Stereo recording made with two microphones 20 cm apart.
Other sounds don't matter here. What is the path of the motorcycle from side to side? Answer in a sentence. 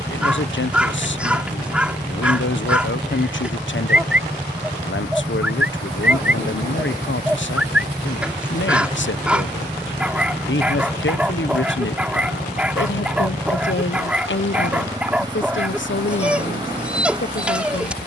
You can hear the motorcycle stay put.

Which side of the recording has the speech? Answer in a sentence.
In this clip you hear the speech on the left.